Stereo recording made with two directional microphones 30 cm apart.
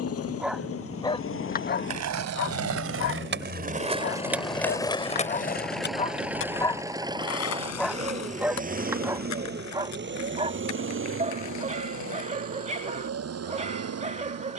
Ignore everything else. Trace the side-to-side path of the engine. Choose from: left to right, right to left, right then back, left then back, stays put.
left to right.